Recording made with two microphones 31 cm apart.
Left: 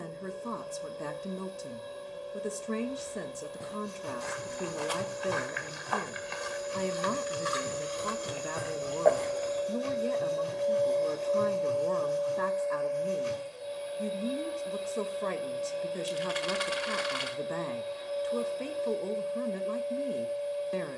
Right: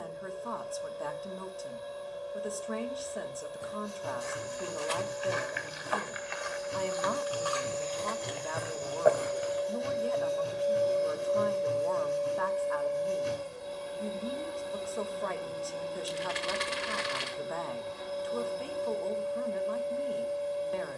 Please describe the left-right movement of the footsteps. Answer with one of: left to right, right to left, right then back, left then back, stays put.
left to right.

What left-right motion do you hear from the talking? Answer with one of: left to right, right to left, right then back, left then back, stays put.
stays put.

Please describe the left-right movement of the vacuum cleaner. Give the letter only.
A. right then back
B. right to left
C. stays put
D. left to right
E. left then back
D.